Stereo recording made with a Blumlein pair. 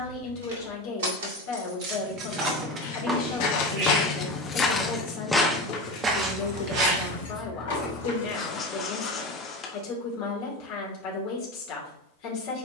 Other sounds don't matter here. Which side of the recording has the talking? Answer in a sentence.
In this clip you hear the talking on the left.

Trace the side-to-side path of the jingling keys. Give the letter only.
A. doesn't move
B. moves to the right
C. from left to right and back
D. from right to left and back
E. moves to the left
E.